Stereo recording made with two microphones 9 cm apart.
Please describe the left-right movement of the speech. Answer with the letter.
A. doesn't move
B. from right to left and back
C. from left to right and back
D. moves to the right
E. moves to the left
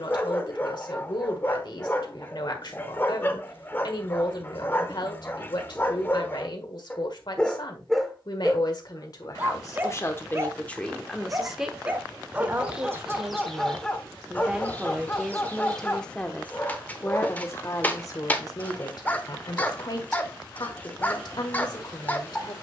C.